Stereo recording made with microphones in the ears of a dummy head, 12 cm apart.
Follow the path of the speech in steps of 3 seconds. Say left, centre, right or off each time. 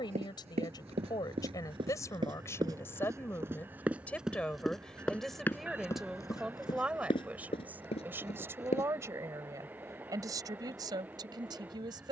left, centre, centre, right.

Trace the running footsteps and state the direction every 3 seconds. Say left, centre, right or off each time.
right, centre, left, off.